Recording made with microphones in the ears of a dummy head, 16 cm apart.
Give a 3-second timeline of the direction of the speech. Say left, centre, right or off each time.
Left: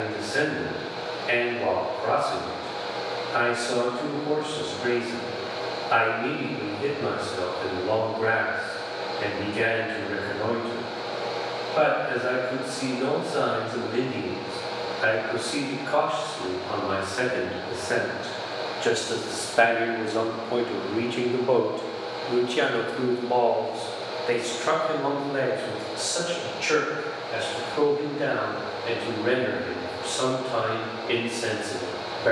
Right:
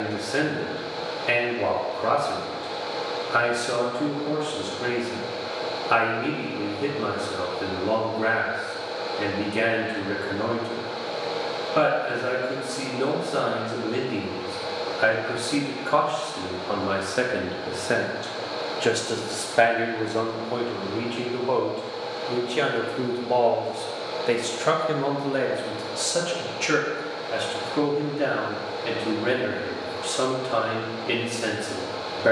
right, right, right, right, right, right, centre, centre, right, right, right.